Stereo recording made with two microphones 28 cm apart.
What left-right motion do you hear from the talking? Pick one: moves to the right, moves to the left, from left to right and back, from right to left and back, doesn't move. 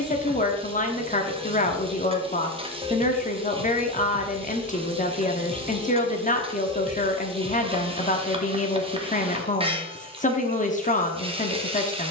doesn't move.